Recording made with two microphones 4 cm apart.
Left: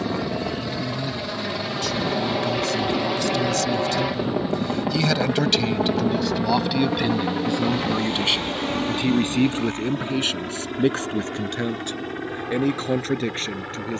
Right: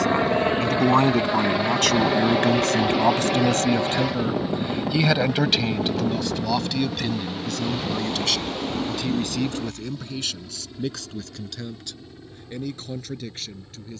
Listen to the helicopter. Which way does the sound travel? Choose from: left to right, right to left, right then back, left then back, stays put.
right to left.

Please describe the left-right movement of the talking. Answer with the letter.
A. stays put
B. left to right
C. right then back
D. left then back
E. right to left
E.